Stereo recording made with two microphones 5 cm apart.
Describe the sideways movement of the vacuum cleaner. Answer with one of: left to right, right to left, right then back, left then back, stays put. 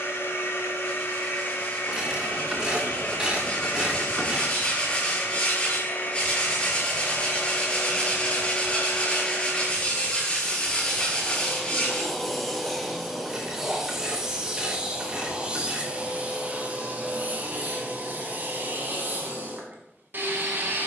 left to right.